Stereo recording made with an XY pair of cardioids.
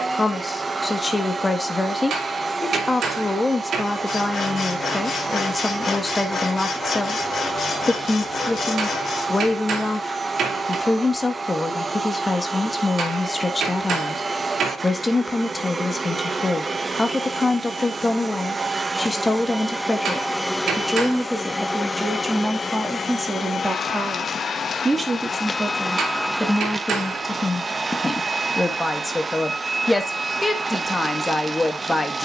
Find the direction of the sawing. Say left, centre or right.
left.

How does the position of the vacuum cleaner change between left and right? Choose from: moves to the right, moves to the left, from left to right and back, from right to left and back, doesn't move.
from right to left and back.